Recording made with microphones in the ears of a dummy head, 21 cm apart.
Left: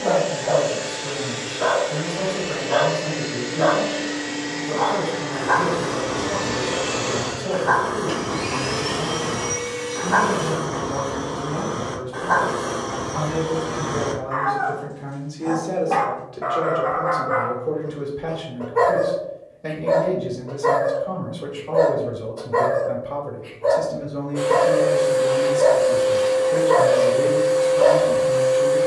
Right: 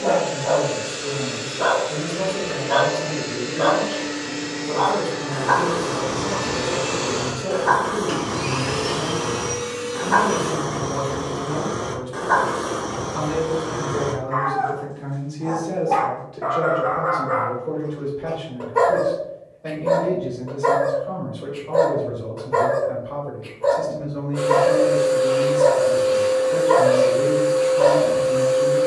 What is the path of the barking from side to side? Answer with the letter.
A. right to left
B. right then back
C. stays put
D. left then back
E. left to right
D.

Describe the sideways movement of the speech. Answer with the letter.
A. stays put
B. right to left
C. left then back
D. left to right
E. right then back
B.